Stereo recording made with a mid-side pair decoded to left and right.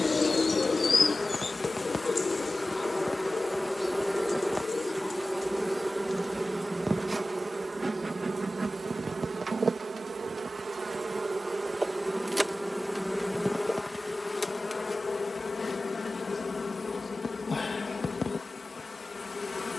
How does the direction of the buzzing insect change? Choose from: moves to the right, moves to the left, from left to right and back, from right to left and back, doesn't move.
from left to right and back.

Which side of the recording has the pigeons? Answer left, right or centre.
left.